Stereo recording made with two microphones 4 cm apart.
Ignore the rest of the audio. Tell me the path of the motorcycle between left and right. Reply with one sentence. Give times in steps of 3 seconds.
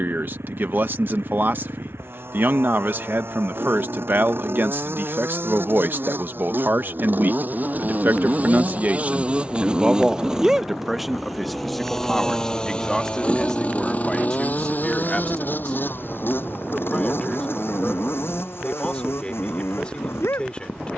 You can hear the motorcycle on the right from 0 s, in the centre from 9 s and on the left from 12 s.